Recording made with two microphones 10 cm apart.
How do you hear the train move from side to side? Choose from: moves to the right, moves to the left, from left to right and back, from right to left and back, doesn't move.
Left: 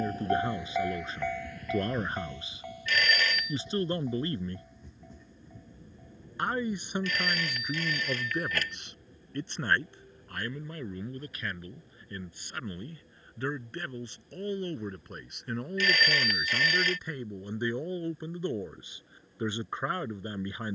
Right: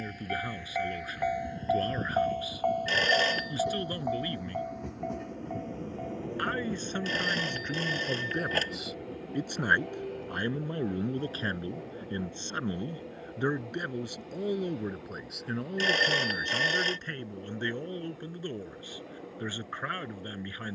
moves to the right.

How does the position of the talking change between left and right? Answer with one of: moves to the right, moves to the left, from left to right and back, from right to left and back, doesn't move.
from left to right and back.